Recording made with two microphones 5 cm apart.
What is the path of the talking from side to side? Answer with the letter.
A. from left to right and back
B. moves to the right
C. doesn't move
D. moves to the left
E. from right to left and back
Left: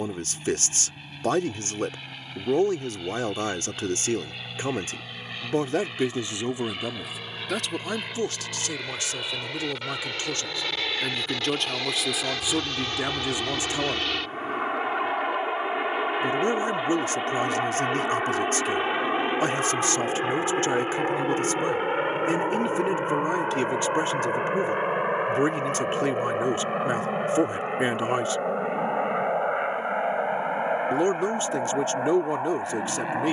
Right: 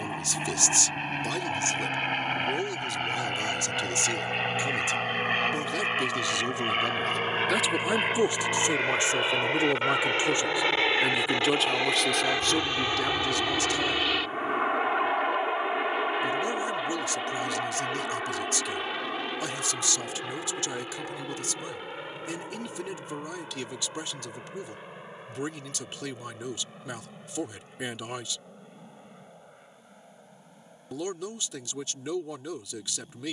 A.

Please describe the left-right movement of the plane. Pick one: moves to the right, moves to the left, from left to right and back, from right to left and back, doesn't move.
moves to the left.